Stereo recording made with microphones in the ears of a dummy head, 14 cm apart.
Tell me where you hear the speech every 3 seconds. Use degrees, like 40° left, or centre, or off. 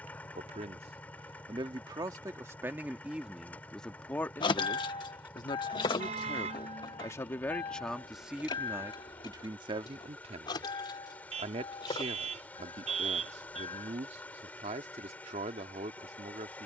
30° right, 10° left, 10° left, 30° right, 40° right, 40° right.